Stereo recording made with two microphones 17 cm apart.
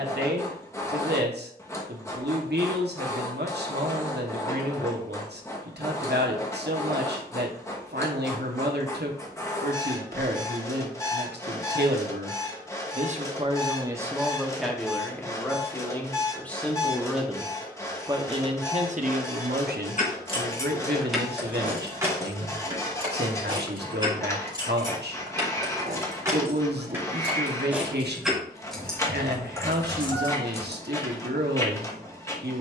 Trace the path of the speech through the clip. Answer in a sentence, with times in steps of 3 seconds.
In this clip you hear the speech on the right from 0 s, in the centre from 15 s and on the right from 18 s.